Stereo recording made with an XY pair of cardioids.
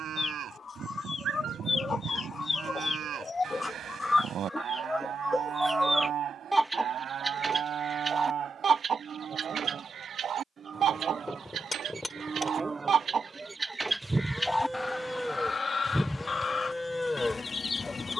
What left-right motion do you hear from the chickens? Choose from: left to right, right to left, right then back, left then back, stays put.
right then back.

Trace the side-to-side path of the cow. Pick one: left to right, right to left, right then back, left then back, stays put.
right to left.